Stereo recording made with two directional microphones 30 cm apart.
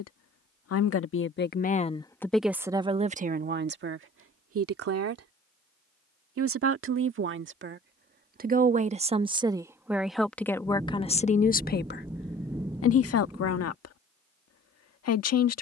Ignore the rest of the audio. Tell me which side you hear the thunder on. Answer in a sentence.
You can hear the thunder in the centre.